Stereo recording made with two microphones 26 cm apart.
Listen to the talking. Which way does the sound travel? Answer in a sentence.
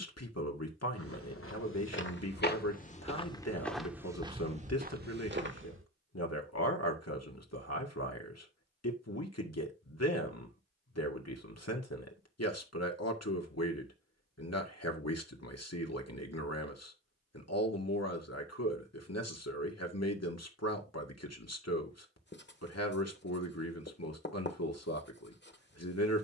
In this clip you hear the talking stay in one place.